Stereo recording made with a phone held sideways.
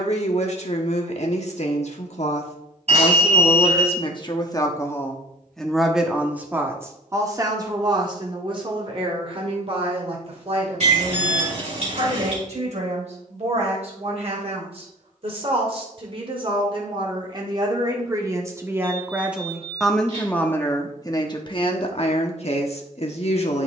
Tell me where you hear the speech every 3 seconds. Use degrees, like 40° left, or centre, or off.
50° left, 30° left, 30° right, 40° right, 50° right, 40° right, centre, 40° left.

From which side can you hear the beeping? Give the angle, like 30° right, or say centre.
50° right.